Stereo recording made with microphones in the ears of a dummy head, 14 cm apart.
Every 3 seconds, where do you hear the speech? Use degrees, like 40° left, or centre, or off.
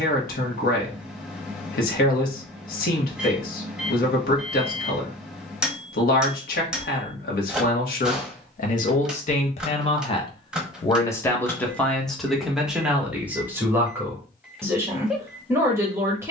70° left, 70° left, 70° left, 30° left, 10° right, 20° right.